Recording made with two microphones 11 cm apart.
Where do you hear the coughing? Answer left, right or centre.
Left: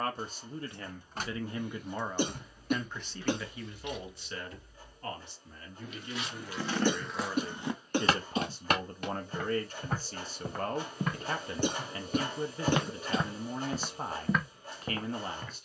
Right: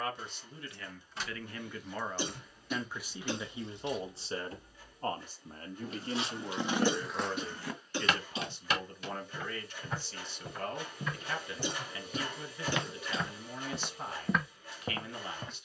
left.